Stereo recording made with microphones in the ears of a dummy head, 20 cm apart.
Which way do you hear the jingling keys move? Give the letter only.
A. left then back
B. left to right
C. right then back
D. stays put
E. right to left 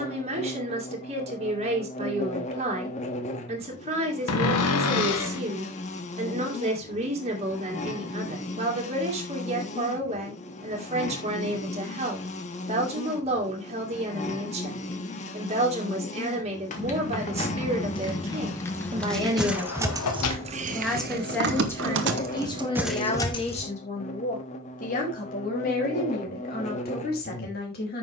C.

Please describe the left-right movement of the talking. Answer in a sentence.
In this clip you hear the talking go from the right side to the left.